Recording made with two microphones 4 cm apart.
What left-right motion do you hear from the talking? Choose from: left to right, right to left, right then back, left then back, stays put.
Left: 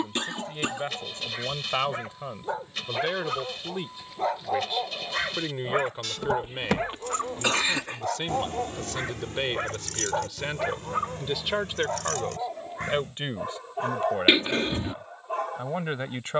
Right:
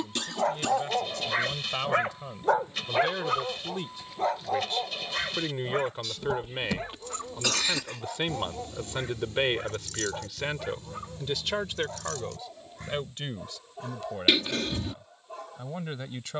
right then back.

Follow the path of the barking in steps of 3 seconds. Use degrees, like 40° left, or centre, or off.
50° right, centre, 40° left, 50° left, 50° left, 50° left.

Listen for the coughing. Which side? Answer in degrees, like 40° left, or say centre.
30° left.